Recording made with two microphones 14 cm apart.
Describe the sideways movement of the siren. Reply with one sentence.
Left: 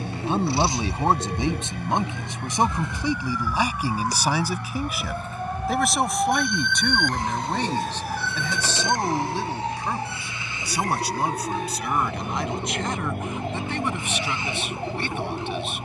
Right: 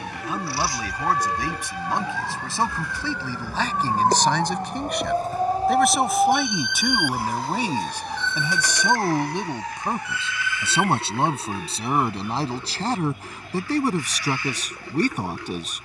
You can hear the siren go from the right side to the left.